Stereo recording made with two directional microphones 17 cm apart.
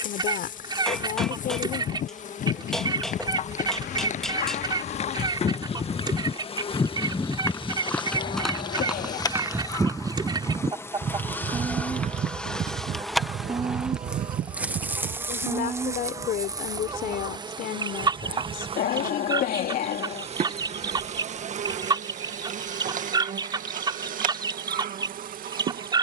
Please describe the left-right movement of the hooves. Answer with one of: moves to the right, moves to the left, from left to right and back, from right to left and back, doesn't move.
moves to the right.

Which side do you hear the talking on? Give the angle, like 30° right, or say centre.
60° left.